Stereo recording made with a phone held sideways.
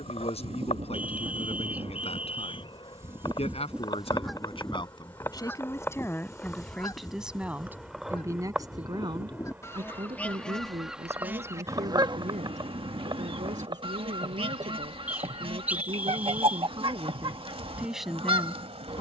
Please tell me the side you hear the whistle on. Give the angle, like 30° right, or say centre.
10° right.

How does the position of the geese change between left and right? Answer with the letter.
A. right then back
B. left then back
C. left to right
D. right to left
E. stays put
B.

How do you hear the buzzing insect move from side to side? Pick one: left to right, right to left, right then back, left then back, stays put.
left to right.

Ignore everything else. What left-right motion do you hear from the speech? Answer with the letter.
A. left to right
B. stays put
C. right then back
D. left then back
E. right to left
C.